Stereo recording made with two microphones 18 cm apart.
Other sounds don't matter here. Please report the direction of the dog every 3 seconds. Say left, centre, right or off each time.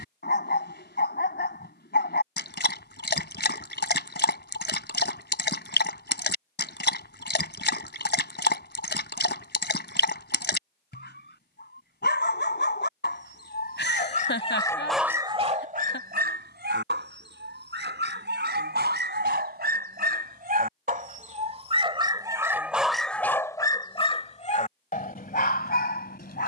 left, left, left, left, left, right, right, centre, left.